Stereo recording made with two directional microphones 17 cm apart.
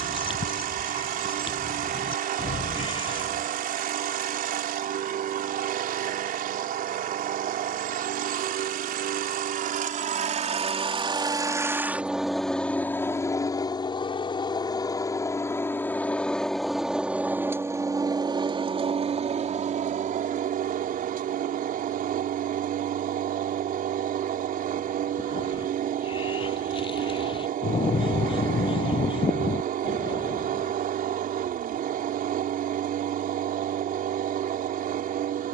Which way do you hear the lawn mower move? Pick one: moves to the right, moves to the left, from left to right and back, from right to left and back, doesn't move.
from right to left and back.